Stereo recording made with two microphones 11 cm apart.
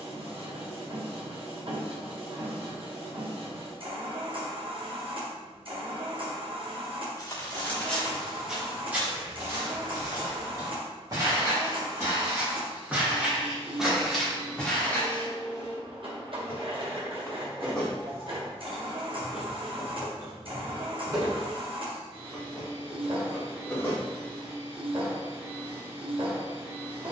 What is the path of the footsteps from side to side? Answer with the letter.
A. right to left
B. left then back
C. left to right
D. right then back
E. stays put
D.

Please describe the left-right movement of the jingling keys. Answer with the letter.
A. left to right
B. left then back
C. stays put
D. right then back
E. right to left
D.